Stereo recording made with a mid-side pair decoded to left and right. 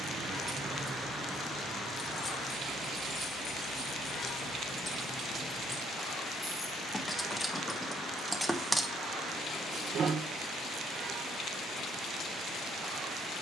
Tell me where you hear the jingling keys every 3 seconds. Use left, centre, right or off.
centre, left, centre, right, off.